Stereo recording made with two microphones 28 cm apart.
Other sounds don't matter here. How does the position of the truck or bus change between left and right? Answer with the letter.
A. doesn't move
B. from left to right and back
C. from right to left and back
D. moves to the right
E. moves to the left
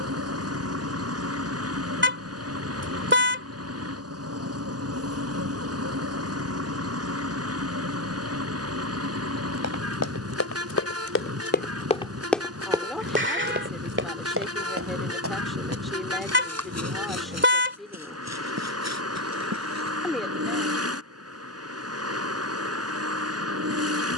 A.